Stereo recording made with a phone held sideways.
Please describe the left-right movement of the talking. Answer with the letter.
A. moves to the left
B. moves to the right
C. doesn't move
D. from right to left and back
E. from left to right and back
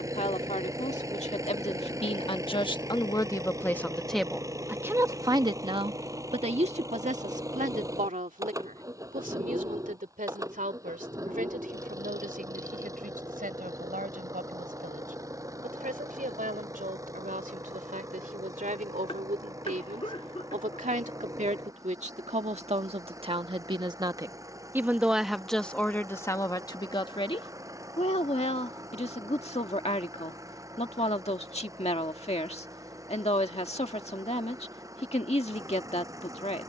E.